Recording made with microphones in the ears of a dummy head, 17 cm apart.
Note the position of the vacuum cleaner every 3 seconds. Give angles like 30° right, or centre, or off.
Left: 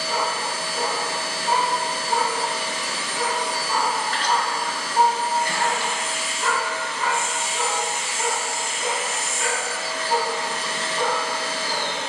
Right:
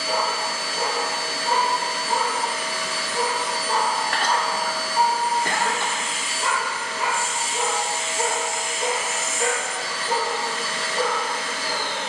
30° left, centre, 30° right, 10° left.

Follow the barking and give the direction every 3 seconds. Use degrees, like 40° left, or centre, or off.
40° right, centre, 20° right, 40° right.